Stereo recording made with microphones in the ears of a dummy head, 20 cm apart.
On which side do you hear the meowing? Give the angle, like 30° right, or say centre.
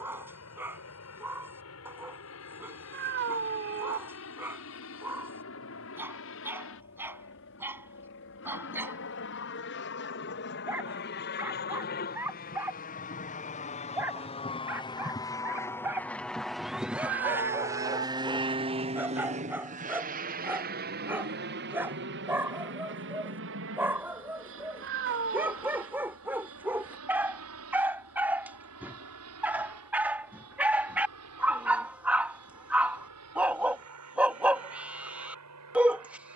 50° right.